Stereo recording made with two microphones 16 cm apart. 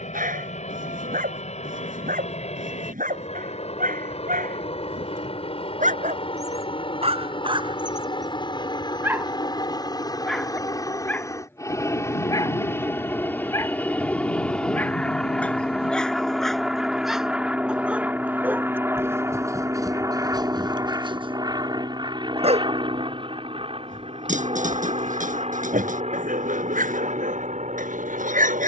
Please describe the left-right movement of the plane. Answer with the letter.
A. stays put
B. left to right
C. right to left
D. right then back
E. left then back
B.